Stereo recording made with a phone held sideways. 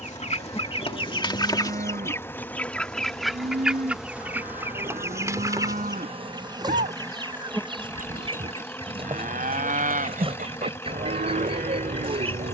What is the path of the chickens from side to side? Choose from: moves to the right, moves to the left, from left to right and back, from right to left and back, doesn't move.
moves to the right.